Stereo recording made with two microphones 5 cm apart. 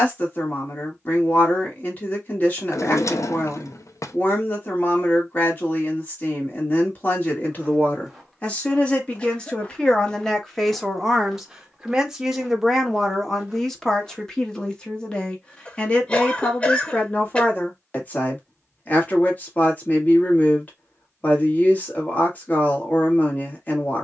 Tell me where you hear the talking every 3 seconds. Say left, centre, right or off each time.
left, left, left, centre, centre, left, left, left.